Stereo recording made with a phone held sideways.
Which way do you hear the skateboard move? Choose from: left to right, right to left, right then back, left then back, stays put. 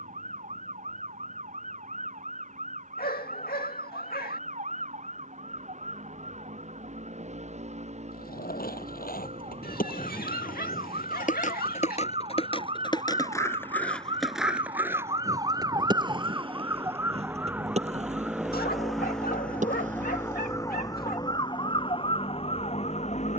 left to right.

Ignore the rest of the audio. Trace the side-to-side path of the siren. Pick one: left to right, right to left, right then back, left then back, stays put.
right to left.